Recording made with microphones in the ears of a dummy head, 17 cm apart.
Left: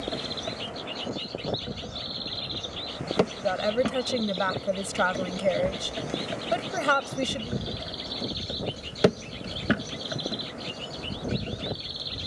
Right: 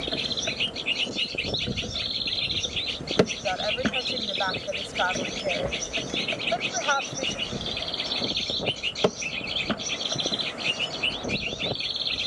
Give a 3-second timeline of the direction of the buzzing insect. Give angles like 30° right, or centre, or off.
20° right, 10° right, 10° left, 20° left.